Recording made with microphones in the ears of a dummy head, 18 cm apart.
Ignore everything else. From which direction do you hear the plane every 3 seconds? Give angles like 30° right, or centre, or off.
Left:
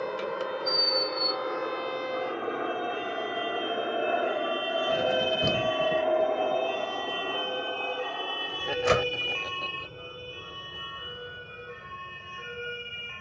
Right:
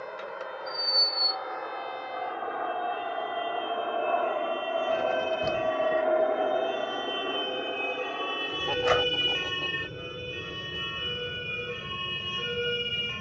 50° left, 20° left, 10° right, 40° right, 40° right.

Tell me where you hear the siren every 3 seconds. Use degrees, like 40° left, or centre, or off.
70° left, 50° left, 20° left, 20° right, 40° right.